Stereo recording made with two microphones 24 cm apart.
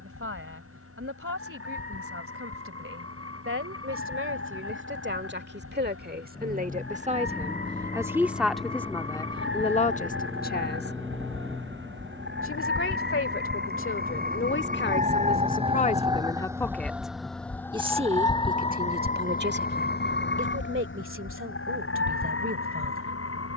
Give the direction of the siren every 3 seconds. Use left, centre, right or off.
right, right, right, right, right, centre, left, left.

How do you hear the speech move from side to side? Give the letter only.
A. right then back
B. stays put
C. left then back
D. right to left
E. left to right
C.